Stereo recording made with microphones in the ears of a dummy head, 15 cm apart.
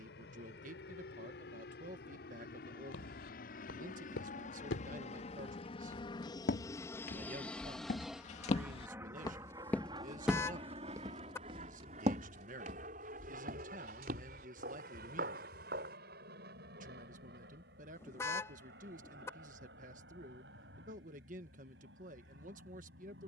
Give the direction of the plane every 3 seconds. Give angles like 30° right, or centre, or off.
70° left, 50° left, 10° left, 30° right, 50° right, 50° right, 60° right, 60° right.